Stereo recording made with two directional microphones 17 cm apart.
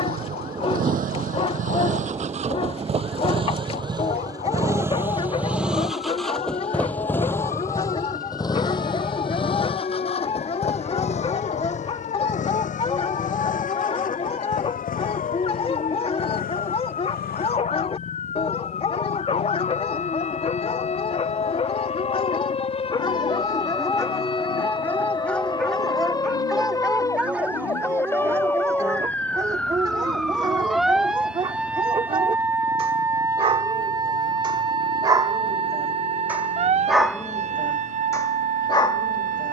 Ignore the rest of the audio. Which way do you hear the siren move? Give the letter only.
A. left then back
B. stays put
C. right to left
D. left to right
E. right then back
D.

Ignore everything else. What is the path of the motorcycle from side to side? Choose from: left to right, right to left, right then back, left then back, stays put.
right to left.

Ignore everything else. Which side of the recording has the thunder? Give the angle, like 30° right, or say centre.
30° right.